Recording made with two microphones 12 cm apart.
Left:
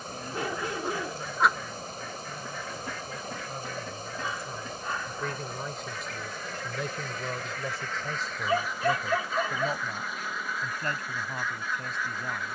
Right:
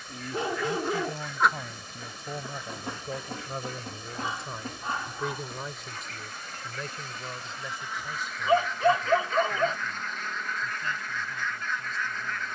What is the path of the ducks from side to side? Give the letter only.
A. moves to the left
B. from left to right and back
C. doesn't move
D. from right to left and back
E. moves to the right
B.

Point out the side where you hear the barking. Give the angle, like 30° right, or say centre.
30° right.